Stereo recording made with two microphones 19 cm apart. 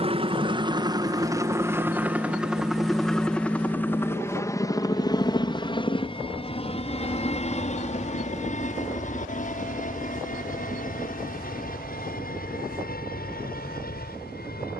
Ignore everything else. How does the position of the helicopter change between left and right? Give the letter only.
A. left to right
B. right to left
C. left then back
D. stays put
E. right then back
B.